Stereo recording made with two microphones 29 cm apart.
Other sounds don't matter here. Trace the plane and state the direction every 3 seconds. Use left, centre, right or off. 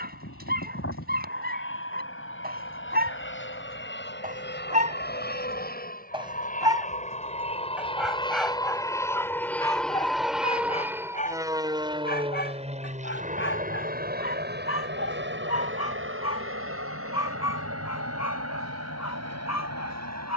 left, left, left, centre, right, right, right.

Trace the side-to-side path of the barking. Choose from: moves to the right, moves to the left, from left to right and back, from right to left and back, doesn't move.
moves to the left.